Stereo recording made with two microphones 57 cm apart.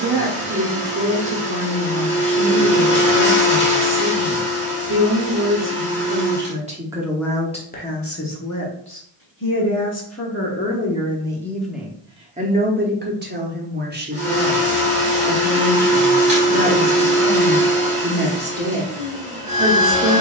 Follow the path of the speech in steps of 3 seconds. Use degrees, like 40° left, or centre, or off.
20° right, 20° right, 10° left, 20° left, 20° right, 20° right, 20° right.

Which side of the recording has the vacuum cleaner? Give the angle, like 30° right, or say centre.
10° right.